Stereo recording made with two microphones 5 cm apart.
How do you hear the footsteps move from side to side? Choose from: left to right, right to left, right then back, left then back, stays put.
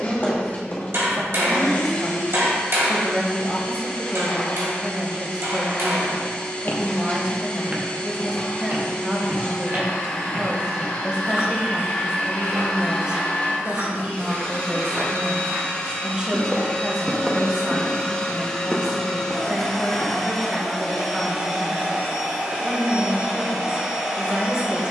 right then back.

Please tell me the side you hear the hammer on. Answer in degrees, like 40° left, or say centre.
60° right.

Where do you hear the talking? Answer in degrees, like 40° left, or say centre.
20° right.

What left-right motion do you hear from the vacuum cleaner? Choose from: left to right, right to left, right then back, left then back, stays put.
left to right.